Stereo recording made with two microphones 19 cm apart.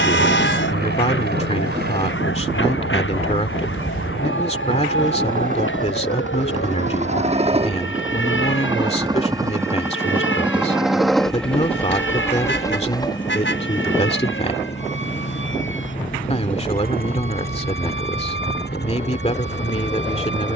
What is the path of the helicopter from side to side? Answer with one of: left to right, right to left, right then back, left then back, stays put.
right to left.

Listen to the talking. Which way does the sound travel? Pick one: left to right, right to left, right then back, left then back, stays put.
stays put.